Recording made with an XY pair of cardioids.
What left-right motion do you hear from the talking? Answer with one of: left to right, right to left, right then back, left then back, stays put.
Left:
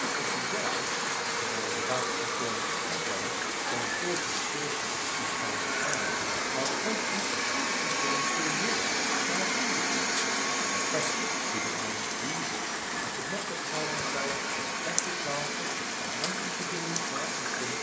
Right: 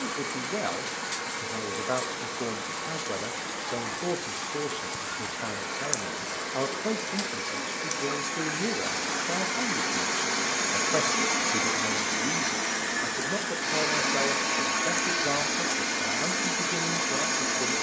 stays put.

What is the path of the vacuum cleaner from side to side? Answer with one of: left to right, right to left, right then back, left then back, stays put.
left to right.